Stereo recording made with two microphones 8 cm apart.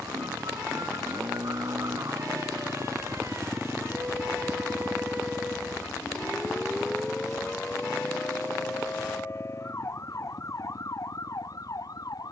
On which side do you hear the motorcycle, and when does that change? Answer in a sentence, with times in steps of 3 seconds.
In this clip you hear the motorcycle on the right from 0 s and on the left from 3 s.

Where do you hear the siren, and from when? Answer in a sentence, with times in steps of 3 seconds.
You can hear the siren on the right from 0 s, in the centre from 6 s and on the left from 9 s.